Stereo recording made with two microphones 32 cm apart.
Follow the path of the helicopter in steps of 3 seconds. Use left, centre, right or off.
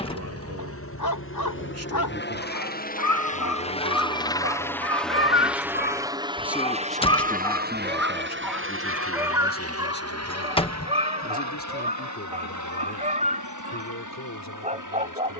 left, centre, right, right, right.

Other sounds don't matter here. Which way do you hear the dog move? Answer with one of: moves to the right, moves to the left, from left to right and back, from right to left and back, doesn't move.
moves to the right.